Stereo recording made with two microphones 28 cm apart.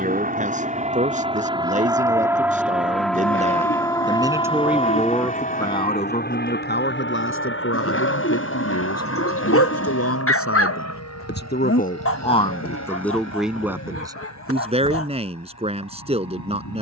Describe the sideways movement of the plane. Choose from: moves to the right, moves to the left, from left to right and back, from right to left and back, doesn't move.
moves to the left.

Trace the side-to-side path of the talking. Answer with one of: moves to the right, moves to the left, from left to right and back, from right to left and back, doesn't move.
from right to left and back.